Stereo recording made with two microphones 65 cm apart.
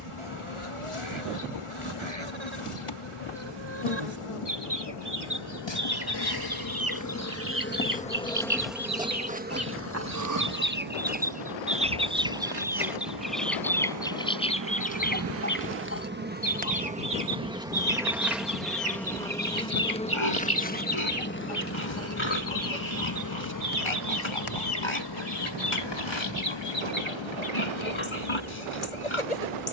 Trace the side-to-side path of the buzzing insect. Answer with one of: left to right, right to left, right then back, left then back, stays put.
right then back.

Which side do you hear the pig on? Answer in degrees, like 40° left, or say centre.
50° left.